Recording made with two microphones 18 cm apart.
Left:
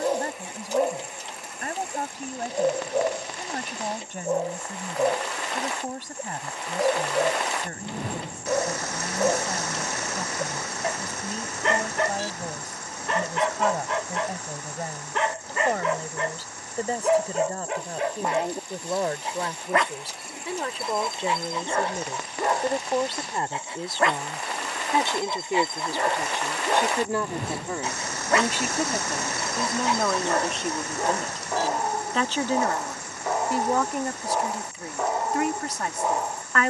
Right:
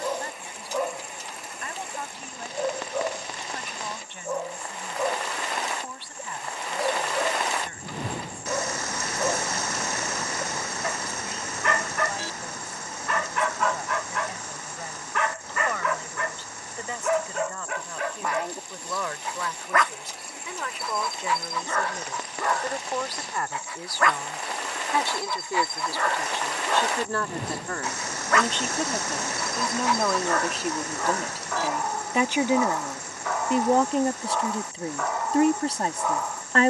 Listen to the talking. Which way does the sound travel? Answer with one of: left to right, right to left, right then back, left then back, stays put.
left to right.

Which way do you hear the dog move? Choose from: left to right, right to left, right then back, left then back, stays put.
stays put.